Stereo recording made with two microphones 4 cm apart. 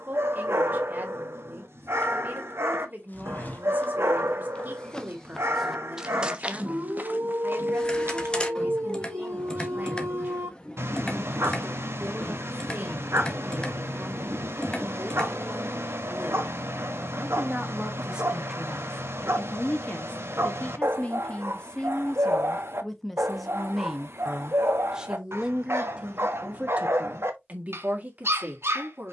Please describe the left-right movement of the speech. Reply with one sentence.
You can hear the speech move from right to left and back again.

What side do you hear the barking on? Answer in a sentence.
In this clip you hear the barking on the right.